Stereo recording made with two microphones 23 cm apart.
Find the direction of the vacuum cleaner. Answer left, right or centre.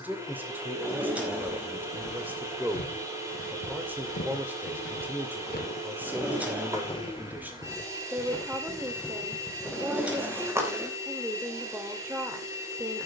centre.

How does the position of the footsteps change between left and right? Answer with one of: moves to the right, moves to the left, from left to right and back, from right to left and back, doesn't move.
moves to the right.